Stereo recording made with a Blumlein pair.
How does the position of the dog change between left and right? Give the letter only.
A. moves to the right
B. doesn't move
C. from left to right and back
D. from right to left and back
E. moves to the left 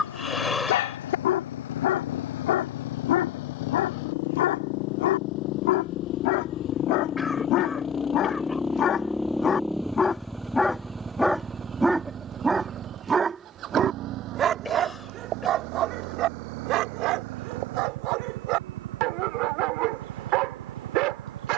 A.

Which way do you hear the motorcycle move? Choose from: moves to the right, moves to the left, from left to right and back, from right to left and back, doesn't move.
moves to the right.